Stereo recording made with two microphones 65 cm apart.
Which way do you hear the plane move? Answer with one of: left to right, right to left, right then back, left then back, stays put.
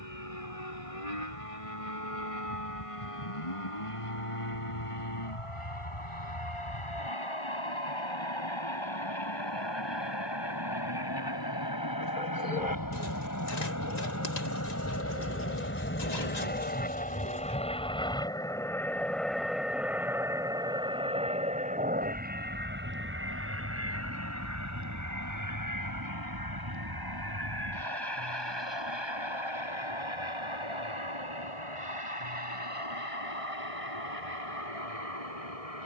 left to right.